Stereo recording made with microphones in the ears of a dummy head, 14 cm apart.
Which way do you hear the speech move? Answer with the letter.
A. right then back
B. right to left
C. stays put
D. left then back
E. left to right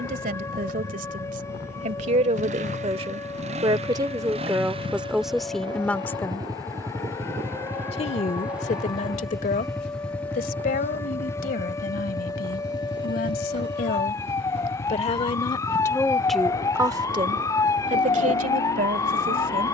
D.